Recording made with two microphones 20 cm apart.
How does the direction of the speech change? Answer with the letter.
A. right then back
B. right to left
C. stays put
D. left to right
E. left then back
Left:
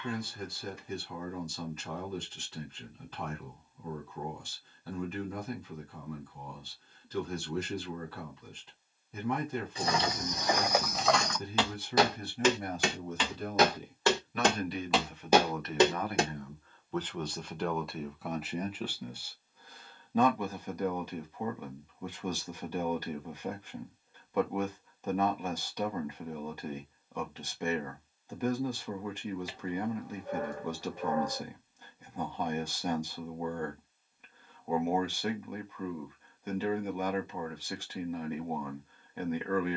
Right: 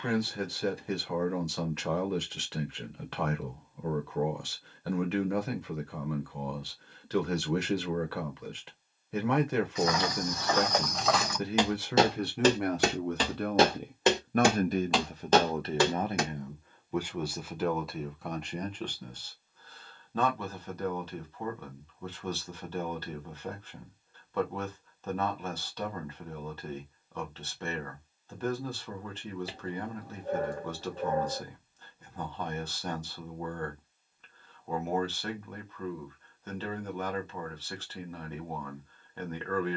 B.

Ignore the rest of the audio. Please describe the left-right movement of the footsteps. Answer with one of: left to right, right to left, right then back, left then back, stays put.
right then back.